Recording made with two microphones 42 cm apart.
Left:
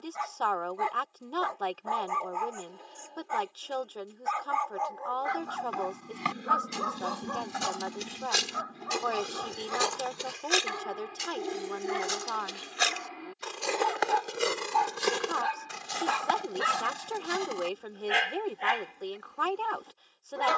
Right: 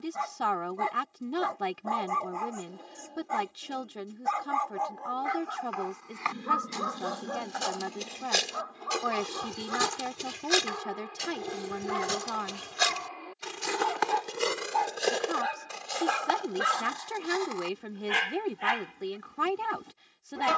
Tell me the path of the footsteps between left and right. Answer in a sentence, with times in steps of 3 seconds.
You can hear the footsteps not at all from 0 s, on the left from 3 s, on the right from 9 s, on the left from 15 s and not at all from 18 s.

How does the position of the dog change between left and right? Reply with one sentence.
In this clip you hear the dog move from right to left and back again.